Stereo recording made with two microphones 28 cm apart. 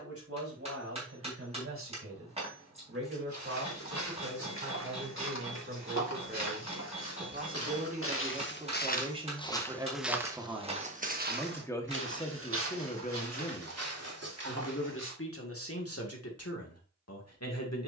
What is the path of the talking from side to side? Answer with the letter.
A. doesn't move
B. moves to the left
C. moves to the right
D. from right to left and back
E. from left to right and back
B.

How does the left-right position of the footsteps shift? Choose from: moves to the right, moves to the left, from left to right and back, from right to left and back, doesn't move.
moves to the right.